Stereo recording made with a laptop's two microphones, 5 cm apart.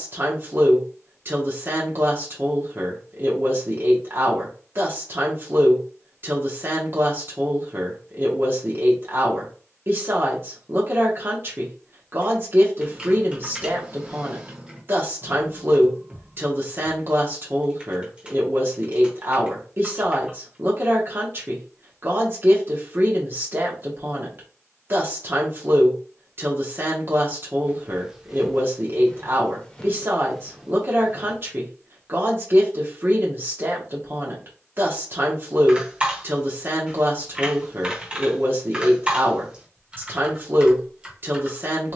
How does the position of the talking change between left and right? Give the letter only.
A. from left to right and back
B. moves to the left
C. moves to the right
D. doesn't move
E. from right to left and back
D.